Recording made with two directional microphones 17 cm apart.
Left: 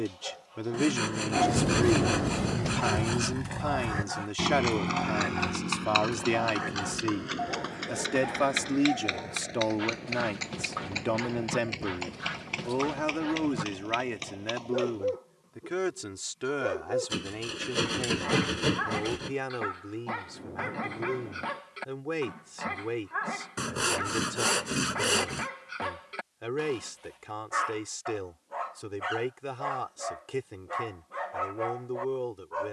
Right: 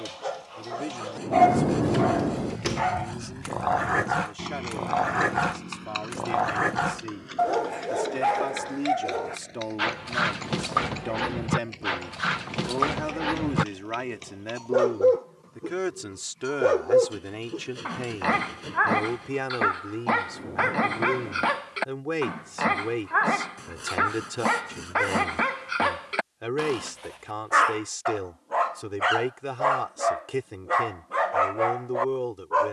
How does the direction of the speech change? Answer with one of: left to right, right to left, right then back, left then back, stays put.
left to right.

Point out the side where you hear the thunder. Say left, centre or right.
right.